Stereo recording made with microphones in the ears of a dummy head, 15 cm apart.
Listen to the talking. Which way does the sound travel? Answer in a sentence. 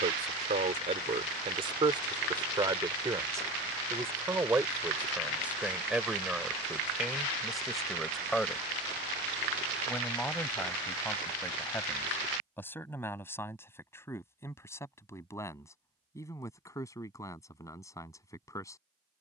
In this clip you hear the talking move to the left.